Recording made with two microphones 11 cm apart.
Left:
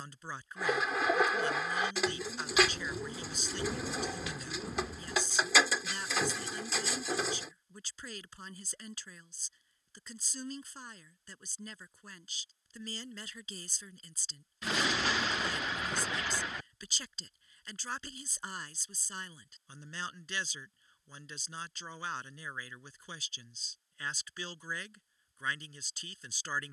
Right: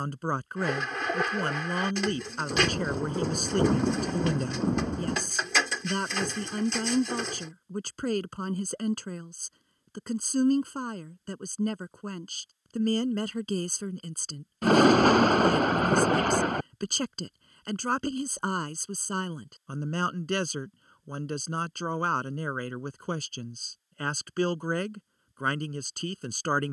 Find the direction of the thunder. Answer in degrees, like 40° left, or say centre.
50° right.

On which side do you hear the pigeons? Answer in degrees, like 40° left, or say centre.
centre.